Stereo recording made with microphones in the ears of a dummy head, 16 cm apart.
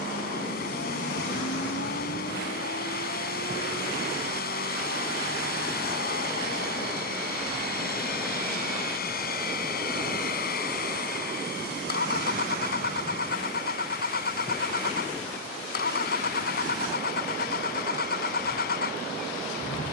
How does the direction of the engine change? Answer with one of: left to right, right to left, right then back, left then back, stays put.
stays put.